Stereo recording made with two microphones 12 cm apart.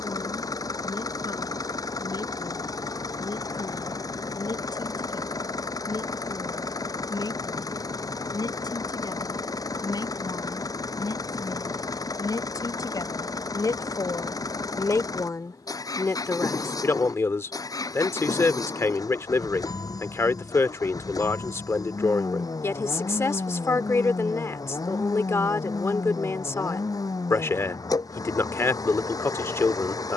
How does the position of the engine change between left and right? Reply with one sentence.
In this clip you hear the engine stay put.